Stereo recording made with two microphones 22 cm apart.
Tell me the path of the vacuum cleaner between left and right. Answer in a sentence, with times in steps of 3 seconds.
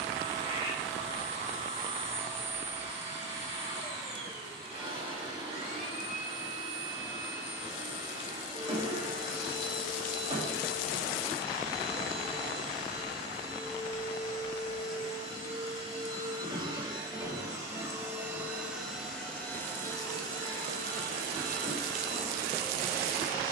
You can hear the vacuum cleaner on the right from 0 s, in the centre from 18 s and on the left from 21 s.